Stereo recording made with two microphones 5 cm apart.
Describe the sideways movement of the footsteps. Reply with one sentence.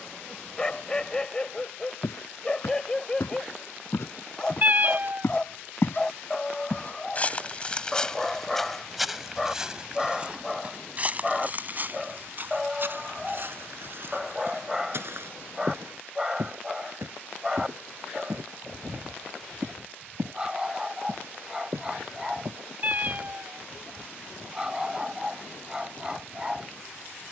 In this clip you hear the footsteps travel towards the right.